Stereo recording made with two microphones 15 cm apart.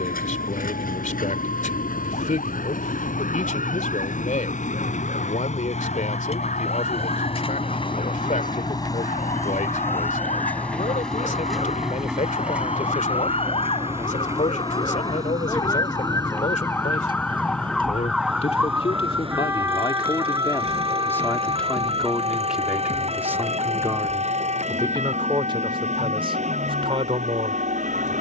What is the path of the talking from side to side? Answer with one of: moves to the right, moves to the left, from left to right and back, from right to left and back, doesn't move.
moves to the right.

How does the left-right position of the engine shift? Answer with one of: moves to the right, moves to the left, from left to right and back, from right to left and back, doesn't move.
moves to the right.